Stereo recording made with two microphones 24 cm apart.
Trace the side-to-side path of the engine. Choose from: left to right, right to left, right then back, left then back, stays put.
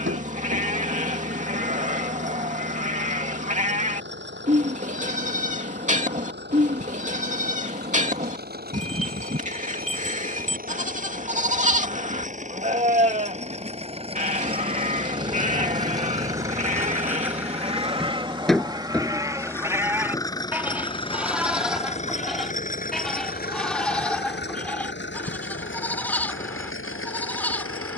right to left.